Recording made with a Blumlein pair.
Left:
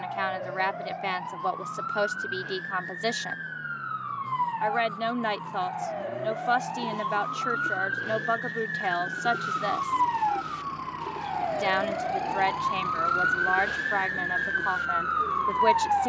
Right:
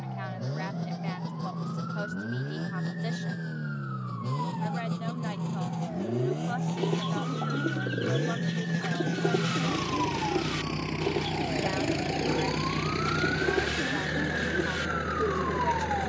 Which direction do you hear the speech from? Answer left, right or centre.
left.